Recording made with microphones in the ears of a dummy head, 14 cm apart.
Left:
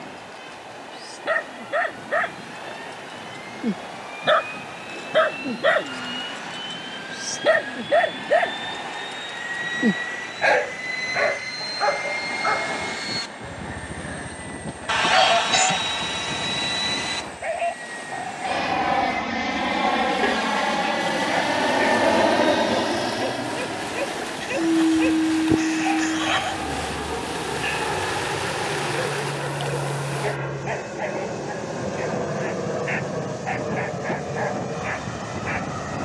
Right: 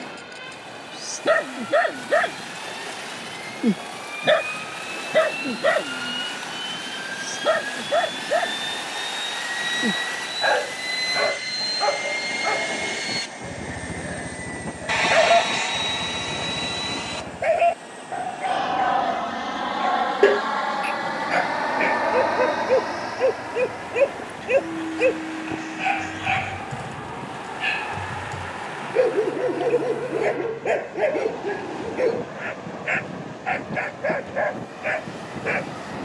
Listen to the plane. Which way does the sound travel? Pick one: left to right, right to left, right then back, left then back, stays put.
right to left.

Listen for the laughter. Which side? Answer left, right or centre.
left.